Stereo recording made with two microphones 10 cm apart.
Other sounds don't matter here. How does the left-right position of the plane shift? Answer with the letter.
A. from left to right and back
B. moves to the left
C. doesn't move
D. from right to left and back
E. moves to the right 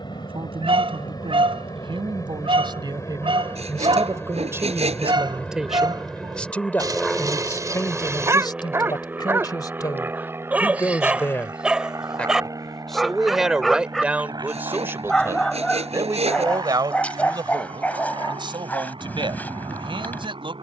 E.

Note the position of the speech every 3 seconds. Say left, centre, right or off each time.
right, right, left, left, centre, right, right.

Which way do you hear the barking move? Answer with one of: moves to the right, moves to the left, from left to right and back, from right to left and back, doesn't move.
moves to the left.